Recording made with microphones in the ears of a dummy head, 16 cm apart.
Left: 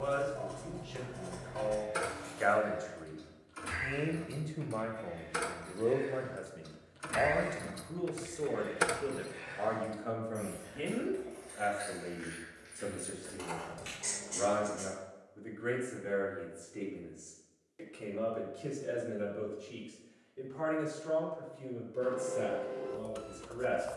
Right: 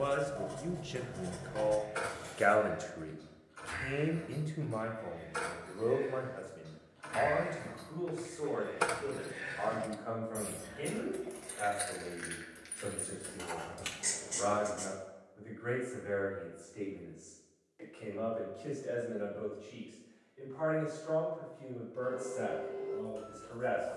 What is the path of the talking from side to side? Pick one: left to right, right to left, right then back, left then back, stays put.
right to left.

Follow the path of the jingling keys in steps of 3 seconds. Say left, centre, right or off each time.
left, left, left, right, right, off, off, off.